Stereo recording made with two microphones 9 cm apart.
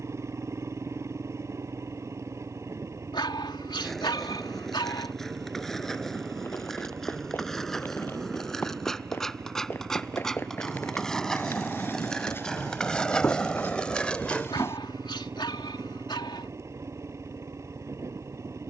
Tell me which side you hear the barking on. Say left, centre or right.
left.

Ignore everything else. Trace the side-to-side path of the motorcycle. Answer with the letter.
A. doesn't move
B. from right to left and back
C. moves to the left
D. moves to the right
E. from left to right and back
A.